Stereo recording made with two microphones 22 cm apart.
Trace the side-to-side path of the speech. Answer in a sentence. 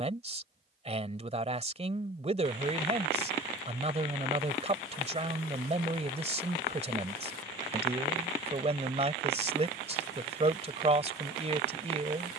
You can hear the speech stay in one place.